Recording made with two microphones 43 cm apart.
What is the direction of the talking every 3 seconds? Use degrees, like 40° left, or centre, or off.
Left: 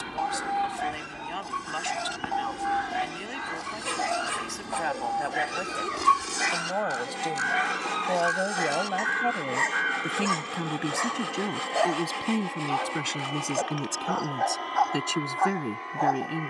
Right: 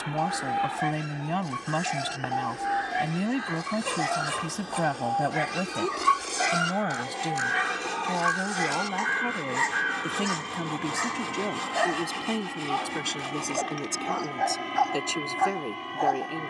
70° right, 60° right, 30° right, 10° left, 20° left, 30° left.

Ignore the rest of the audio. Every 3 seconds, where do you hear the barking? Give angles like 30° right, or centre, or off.
40° right, 30° right, 10° right, 30° right, 40° right, 40° right.